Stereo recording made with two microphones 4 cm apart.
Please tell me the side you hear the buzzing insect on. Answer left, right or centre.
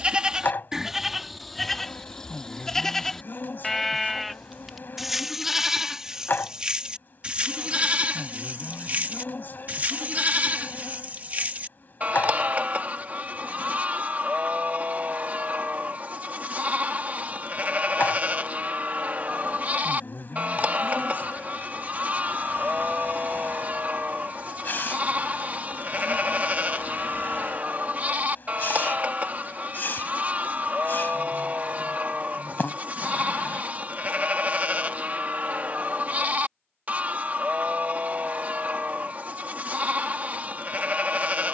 left.